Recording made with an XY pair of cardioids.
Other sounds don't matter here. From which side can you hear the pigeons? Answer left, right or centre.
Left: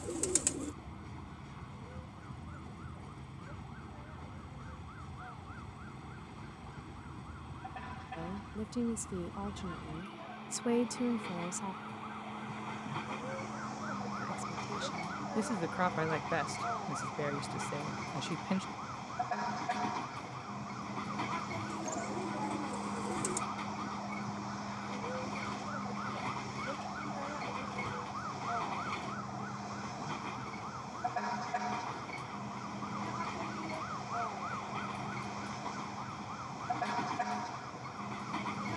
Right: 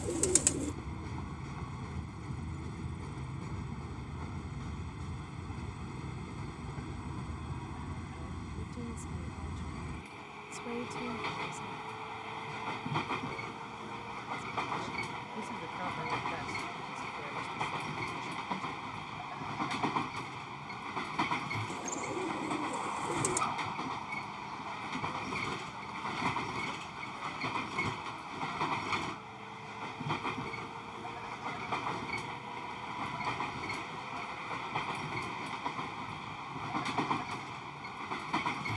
right.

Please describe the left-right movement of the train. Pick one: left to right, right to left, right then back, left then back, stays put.
stays put.